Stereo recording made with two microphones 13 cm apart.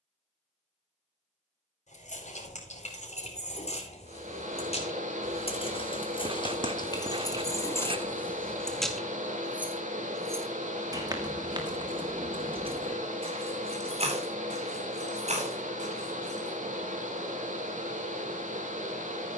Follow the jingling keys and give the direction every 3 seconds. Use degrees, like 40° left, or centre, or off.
70° left, 60° left, 20° left, 30° right, 50° right, 60° right, off.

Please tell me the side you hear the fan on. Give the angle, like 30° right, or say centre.
80° right.